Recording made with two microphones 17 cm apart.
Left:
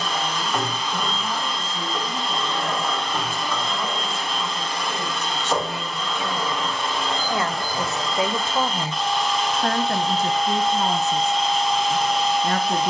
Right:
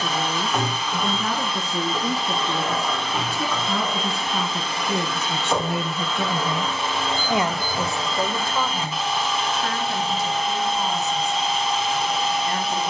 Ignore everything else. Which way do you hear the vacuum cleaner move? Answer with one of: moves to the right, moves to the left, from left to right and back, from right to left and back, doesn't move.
doesn't move.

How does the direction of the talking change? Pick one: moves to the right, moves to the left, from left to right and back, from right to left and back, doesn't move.
moves to the left.